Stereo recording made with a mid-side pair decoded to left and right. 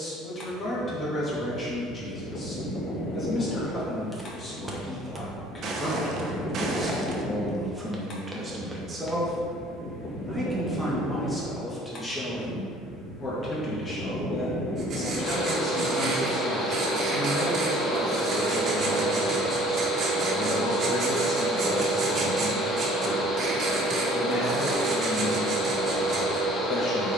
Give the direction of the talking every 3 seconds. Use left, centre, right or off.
left, left, centre, centre, left, left, left, left, left.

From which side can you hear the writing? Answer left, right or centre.
right.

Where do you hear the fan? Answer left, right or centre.
left.